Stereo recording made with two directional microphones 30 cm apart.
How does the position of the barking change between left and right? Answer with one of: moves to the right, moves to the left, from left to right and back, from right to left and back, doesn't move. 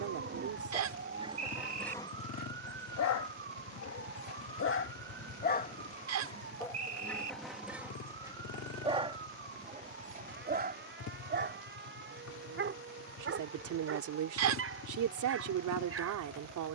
from right to left and back.